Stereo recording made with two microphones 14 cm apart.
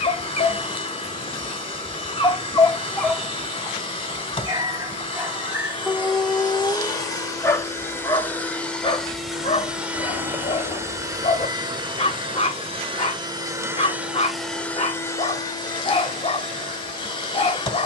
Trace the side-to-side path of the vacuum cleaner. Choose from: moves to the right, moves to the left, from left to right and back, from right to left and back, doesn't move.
from left to right and back.